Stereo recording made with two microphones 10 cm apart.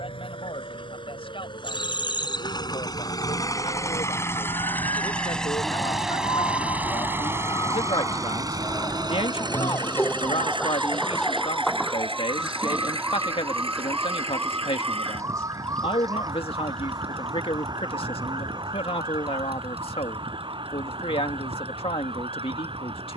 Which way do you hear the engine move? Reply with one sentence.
You can hear the engine travel towards the right.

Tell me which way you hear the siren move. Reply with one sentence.
In this clip you hear the siren move from left to right.